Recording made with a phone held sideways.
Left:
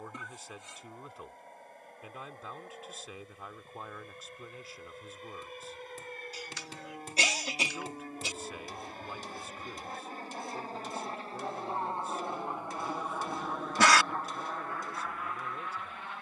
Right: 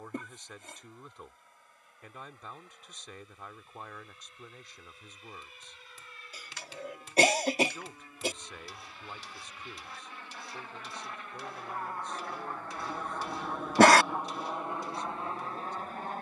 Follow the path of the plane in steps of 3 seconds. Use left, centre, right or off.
left, left, left, left, centre, right.